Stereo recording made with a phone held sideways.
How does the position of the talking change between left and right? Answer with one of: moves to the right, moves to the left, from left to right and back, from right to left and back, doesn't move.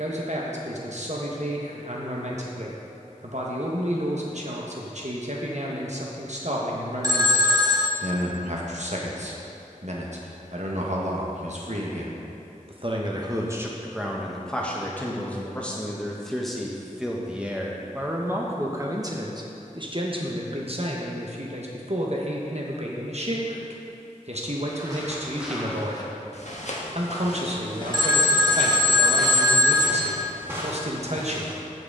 from right to left and back.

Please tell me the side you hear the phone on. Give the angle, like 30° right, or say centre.
30° right.